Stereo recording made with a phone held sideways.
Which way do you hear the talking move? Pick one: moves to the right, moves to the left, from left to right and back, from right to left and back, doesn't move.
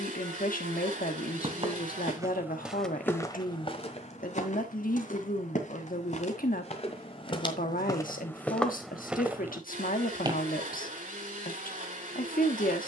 doesn't move.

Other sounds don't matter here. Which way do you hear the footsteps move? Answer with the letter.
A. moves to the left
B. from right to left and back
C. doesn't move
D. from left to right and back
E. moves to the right
B.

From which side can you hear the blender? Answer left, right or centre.
right.